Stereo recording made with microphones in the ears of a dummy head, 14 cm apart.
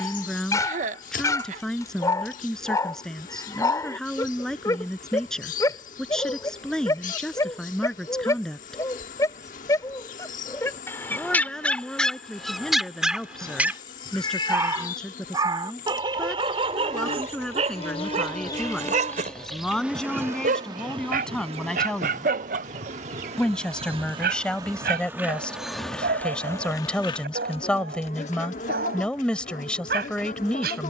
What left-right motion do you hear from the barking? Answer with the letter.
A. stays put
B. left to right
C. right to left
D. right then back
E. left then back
B.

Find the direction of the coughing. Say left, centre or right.
right.